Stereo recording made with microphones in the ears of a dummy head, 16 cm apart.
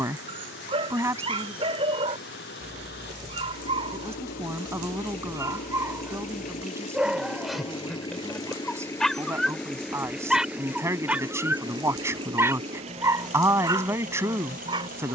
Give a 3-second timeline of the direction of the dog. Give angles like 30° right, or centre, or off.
30° right, 30° right, centre, centre, 20° right.